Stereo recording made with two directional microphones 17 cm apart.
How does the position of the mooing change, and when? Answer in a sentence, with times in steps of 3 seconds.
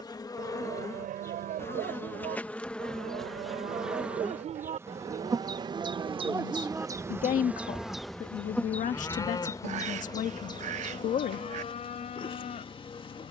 You can hear the mooing on the right from 0 s, in the centre from 6 s and on the left from 9 s.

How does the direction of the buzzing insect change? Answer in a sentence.
You can hear the buzzing insect move from left to right and back again.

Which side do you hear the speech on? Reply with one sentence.
In this clip you hear the speech on the left.